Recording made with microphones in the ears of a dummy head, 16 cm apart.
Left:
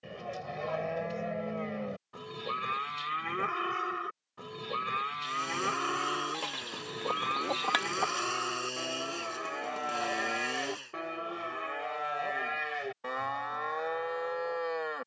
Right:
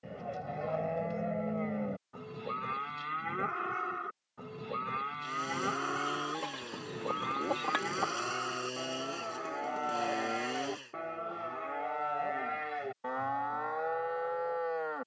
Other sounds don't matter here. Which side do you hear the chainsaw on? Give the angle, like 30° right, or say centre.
40° left.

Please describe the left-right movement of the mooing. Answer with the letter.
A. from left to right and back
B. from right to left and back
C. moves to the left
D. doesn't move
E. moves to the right
D.